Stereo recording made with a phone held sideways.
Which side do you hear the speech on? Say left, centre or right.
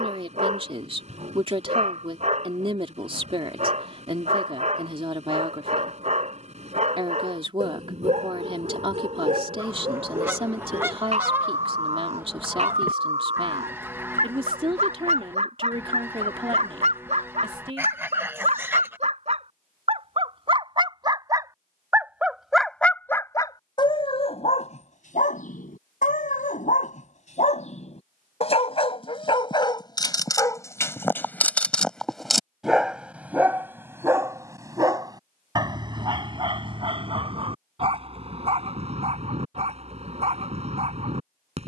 right.